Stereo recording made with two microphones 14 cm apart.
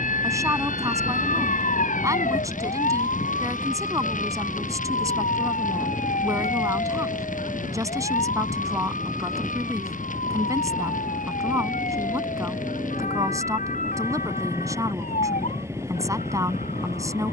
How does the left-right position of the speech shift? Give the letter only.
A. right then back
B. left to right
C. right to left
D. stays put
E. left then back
D.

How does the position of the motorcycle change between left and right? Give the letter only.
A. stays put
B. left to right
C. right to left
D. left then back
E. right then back
A.